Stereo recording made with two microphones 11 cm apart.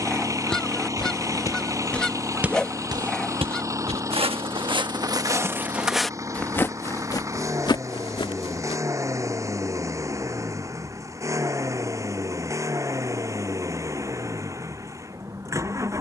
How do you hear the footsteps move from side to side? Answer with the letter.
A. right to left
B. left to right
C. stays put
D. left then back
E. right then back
E.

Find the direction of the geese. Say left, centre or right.
centre.